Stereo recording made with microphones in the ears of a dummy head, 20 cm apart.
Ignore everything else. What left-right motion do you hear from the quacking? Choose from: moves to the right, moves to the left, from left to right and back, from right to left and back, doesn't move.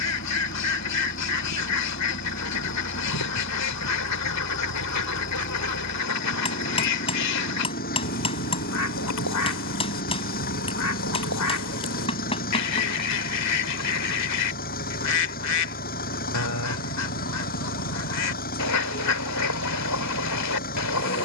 doesn't move.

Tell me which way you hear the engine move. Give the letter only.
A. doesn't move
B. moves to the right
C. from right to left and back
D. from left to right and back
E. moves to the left
A.